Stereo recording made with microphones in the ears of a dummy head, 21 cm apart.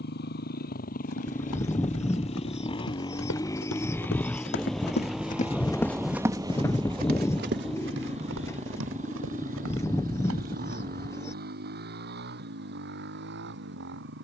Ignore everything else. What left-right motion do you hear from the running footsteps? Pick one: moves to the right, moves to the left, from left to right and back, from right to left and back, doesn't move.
moves to the right.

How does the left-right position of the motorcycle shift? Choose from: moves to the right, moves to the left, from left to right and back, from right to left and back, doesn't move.
moves to the right.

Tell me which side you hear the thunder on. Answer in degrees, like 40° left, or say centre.
centre.